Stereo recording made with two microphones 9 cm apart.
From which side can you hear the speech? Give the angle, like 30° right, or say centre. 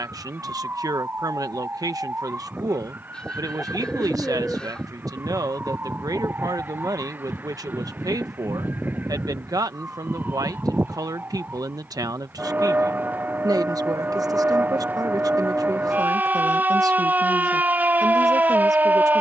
40° right.